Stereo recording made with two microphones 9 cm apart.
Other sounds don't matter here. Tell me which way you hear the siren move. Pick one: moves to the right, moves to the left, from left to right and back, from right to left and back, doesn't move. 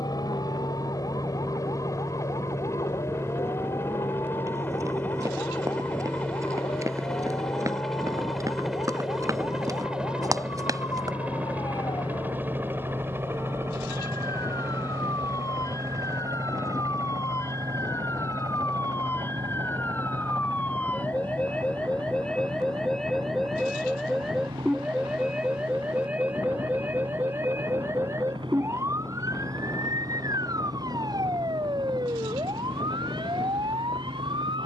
moves to the right.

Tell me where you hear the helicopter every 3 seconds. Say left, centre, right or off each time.
left, left, centre, centre, right, right, right, right, right, right, right, right.